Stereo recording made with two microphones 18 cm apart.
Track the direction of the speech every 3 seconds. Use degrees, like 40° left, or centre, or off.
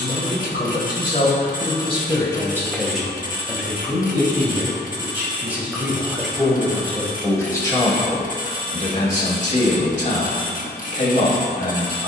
40° left, 10° right, 20° left, 40° left.